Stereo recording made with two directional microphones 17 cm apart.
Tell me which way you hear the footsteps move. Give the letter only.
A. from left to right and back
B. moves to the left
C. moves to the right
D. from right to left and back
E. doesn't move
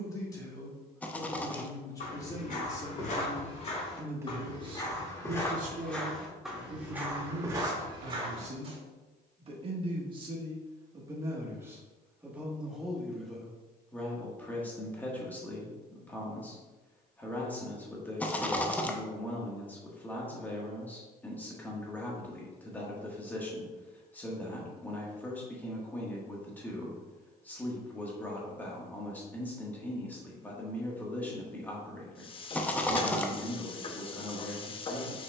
C.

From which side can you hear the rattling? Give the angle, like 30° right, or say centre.
10° left.